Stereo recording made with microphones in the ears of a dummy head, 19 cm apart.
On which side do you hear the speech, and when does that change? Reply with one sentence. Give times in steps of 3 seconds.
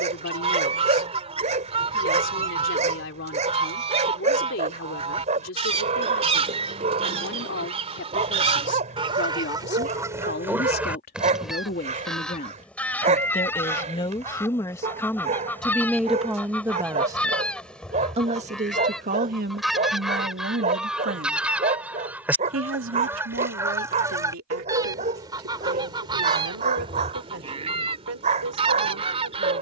In this clip you hear the speech on the left from 0 s, in the centre from 15 s and on the right from 18 s.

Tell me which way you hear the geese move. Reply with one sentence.
In this clip you hear the geese move from right to left and back again.